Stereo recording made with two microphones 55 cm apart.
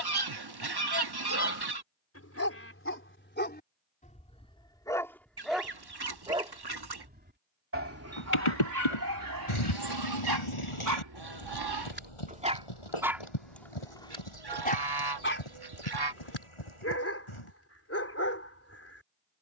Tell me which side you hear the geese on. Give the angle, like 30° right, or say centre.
50° right.